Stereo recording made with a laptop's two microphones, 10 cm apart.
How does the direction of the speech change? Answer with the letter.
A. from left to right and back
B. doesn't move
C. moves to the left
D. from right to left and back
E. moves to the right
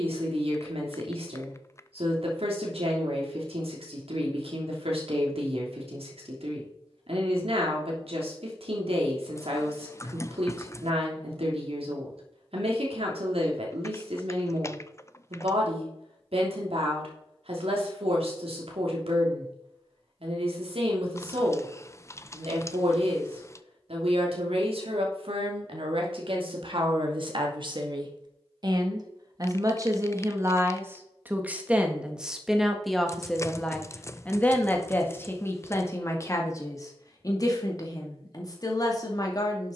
C.